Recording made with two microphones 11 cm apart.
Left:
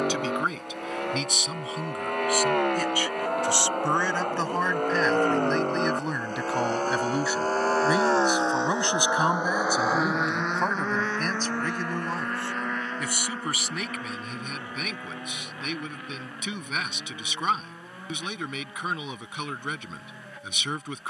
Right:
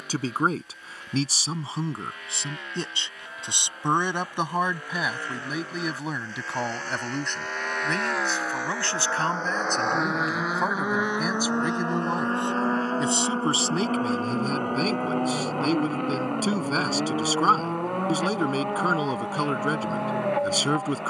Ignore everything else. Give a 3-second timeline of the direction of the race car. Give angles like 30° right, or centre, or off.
70° left, 60° left, 40° left, 10° right, 40° right, 60° right, 60° right.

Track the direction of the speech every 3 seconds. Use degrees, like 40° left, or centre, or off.
30° right, 10° right, 10° left, centre, 30° right, 40° right, 40° right.